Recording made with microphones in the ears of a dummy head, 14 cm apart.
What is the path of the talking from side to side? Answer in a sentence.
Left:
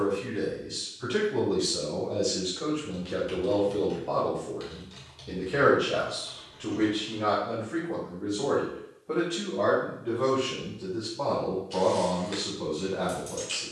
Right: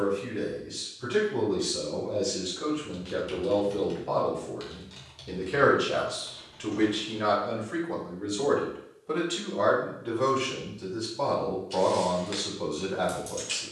In this clip you hear the talking move to the right.